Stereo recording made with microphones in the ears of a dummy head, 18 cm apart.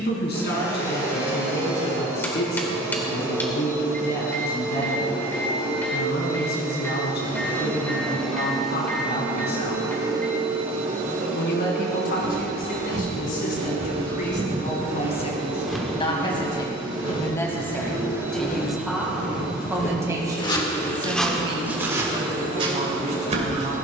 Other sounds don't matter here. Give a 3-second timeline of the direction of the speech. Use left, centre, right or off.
left, left, left, left, left, left, centre, right.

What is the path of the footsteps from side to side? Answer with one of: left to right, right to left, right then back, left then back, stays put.
left then back.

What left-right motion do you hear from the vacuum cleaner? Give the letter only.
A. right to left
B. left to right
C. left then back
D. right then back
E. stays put
D.